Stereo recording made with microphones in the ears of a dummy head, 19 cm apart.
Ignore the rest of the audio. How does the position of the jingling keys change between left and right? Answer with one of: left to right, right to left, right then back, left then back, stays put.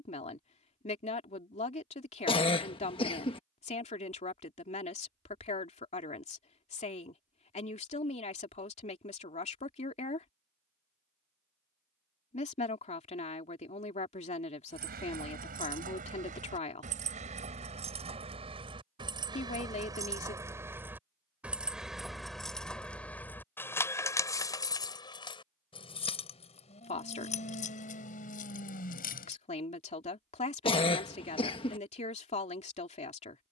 right to left.